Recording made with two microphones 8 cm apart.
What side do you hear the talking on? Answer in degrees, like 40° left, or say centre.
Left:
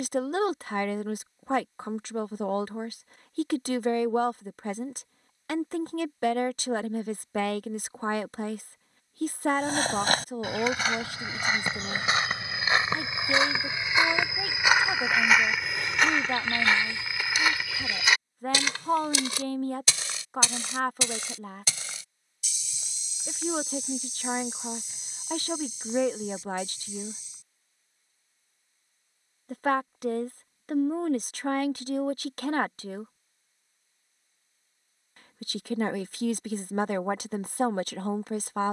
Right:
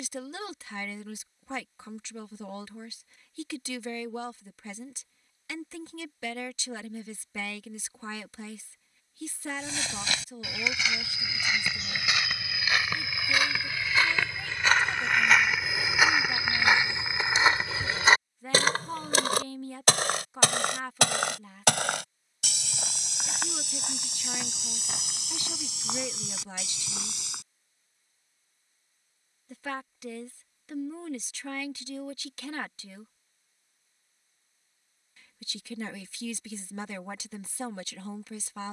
50° left.